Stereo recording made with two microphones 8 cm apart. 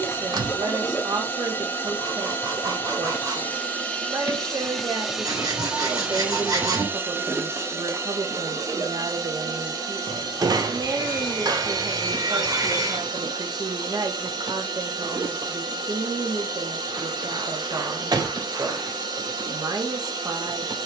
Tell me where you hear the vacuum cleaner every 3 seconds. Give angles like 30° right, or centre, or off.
30° left, 10° left, 30° right, 50° right, 60° right, 60° right, 60° right.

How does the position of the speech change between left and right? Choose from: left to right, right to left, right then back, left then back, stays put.
stays put.